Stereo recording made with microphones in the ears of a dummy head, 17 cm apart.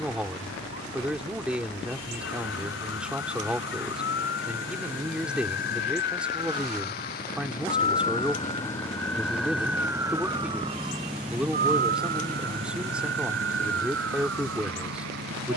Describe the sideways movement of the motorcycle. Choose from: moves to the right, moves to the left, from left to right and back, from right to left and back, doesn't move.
moves to the right.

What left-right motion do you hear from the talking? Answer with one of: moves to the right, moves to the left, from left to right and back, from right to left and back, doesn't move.
doesn't move.